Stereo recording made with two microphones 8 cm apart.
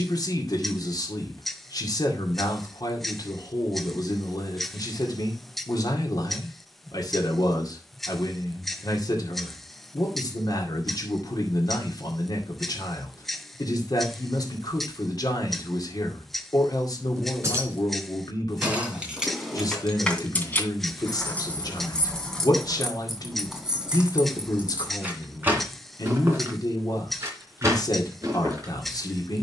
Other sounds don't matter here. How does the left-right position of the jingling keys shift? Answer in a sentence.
You can hear the jingling keys move from right to left and back again.